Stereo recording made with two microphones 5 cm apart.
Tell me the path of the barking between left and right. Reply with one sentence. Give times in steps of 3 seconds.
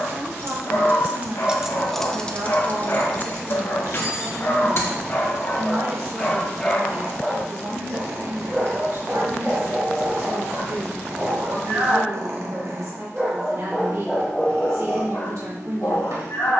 You can hear the barking on the left from 0 s, in the centre from 6 s, on the right from 9 s, in the centre from 12 s and on the left from 15 s.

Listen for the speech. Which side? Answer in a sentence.
You can hear the speech on the right.